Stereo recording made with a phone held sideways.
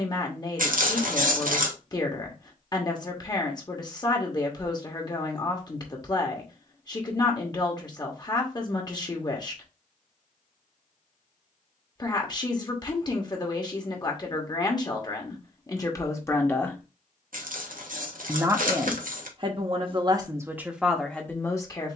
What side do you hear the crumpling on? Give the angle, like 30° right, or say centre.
70° right.